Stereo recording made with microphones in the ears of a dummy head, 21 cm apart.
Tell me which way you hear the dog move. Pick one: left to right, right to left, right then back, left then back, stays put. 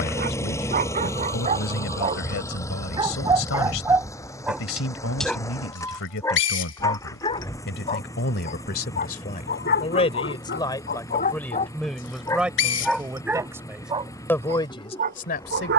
left then back.